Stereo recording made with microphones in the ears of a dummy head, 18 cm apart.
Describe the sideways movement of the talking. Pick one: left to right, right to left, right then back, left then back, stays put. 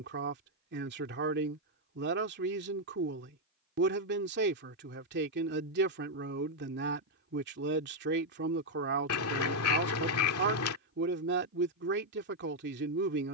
stays put.